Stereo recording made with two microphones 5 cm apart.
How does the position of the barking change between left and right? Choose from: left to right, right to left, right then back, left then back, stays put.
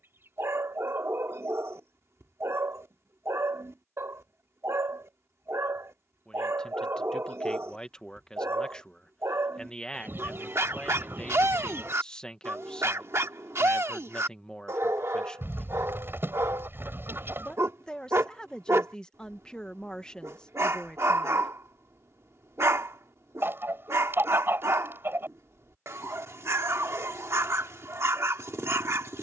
stays put.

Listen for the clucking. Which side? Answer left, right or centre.
right.